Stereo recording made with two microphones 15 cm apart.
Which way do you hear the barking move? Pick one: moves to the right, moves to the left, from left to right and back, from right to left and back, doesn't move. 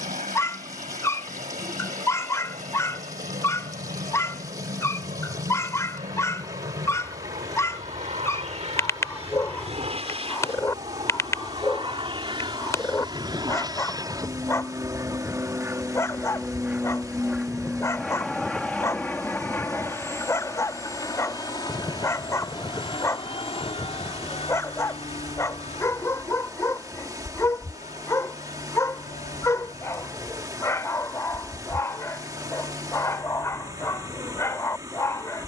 doesn't move.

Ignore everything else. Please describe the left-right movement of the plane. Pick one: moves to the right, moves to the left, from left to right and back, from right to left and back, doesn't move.
moves to the left.